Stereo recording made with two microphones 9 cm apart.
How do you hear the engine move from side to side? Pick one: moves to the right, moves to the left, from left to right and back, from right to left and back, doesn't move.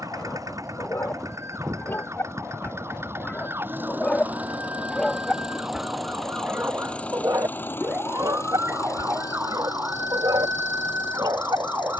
moves to the left.